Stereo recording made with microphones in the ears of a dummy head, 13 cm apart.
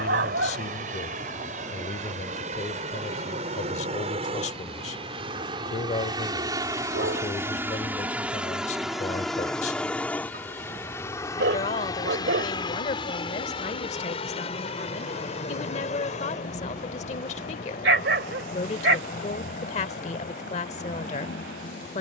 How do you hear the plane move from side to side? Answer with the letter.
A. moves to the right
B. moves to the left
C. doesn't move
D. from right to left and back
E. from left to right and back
B.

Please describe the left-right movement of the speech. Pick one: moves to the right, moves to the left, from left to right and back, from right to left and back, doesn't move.
doesn't move.